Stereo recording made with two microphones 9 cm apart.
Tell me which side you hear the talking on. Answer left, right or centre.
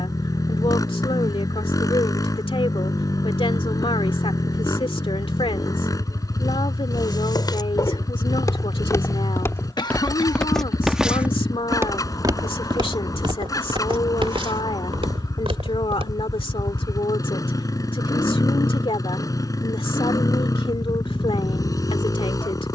left.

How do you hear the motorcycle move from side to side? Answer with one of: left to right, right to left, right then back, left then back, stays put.
stays put.